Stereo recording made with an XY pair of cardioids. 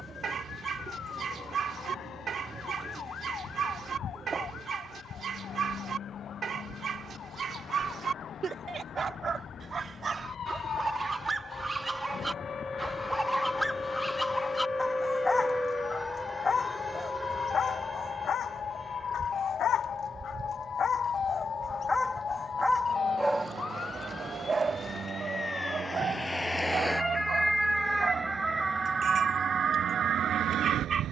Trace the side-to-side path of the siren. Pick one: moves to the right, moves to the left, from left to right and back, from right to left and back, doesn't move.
moves to the right.